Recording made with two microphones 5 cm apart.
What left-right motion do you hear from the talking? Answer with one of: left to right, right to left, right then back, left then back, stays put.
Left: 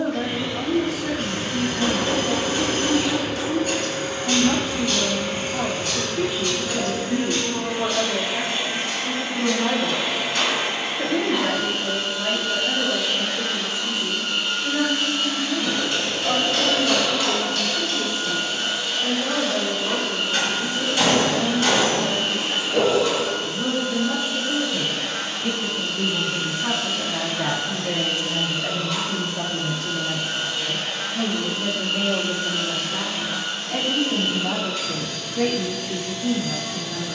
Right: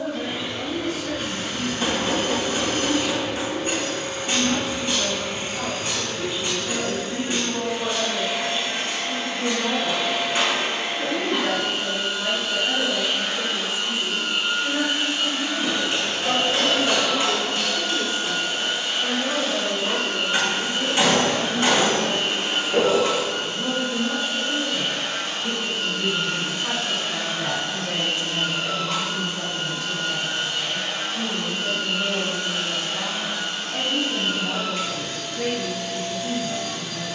right then back.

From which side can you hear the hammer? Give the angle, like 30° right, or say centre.
30° right.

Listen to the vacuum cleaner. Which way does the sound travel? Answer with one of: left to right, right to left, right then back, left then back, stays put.
left to right.